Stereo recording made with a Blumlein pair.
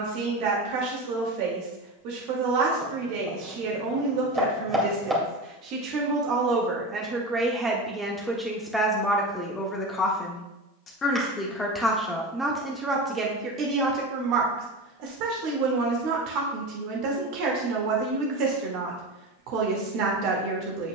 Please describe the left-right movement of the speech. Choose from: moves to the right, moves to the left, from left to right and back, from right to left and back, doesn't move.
from right to left and back.